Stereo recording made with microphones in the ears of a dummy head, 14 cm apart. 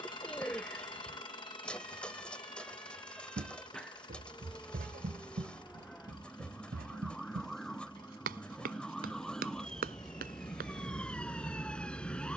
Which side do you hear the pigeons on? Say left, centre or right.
centre.